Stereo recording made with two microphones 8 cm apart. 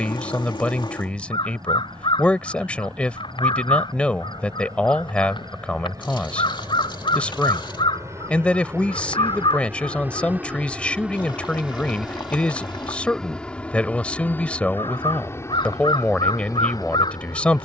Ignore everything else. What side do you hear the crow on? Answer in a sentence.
You can hear the crow on the left.